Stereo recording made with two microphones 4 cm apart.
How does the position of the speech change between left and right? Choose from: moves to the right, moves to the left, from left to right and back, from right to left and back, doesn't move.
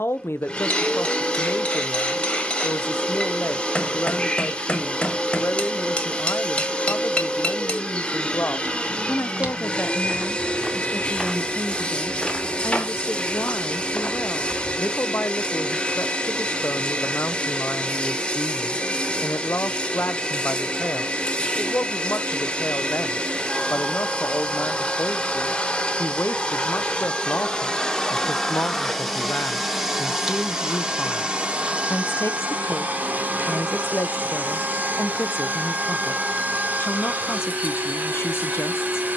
doesn't move.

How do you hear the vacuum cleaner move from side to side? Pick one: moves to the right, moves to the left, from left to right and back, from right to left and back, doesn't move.
moves to the right.